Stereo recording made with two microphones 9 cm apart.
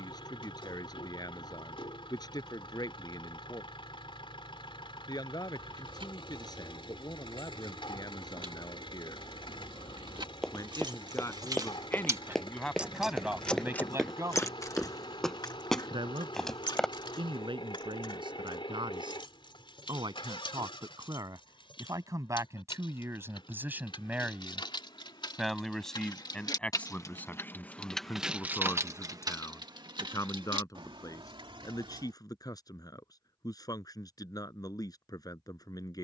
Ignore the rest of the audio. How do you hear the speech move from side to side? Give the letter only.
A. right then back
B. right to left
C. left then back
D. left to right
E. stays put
A.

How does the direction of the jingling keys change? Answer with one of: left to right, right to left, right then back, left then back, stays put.
left then back.